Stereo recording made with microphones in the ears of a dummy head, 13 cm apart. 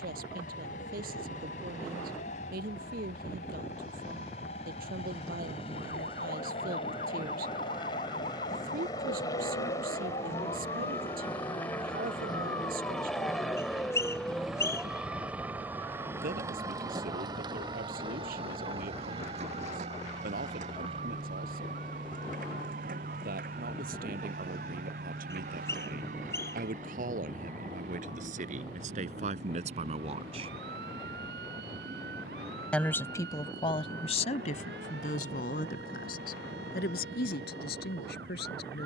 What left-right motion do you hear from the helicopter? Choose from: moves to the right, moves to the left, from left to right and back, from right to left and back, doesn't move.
moves to the right.